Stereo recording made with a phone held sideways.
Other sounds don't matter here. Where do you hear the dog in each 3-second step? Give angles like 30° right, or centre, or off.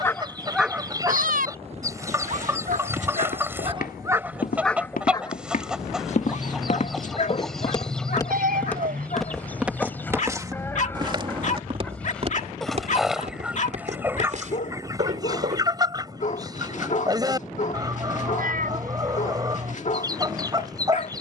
30° right, 10° right, 50° left, 50° left, 50° left, 50° left, 50° left.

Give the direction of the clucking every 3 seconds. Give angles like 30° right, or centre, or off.
20° right, 10° right, centre, 10° left, 10° right, 20° right, 20° right.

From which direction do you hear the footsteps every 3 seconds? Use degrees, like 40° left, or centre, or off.
off, 70° left, 30° left, 20° right, 50° right, 60° right, off.